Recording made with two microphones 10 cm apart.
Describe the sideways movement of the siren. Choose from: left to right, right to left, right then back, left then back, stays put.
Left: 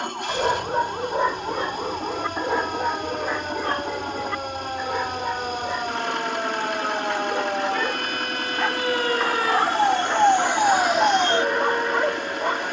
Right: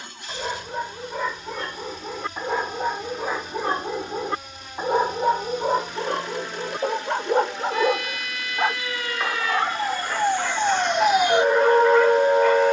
left to right.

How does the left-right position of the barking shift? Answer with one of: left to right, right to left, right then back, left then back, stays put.
right then back.